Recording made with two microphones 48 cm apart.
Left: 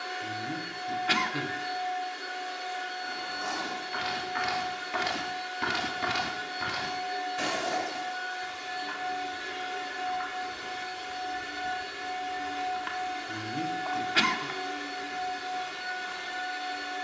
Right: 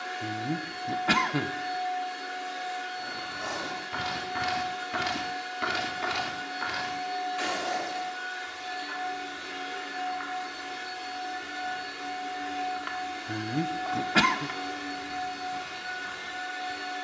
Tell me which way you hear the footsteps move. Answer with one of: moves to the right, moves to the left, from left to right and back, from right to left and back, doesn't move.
from right to left and back.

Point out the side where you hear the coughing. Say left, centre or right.
right.